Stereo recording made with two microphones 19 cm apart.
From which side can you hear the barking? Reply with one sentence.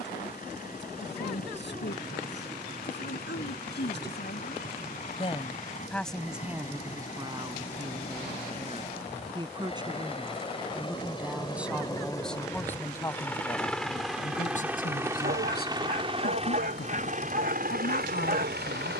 In this clip you hear the barking on the right.